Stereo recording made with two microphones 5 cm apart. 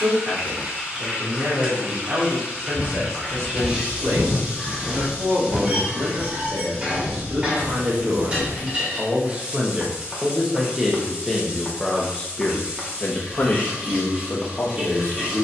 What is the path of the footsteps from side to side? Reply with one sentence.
In this clip you hear the footsteps go from the left side to the right.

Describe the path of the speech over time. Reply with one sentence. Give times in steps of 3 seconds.
In this clip you hear the speech on the right from 0 s, in the centre from 9 s and on the left from 12 s.